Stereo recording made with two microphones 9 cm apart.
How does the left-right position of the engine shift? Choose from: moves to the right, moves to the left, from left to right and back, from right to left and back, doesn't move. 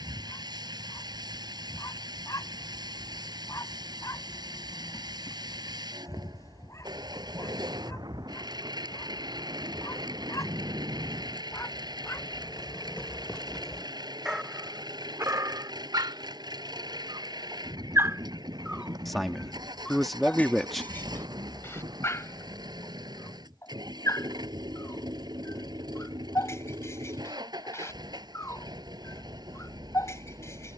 doesn't move.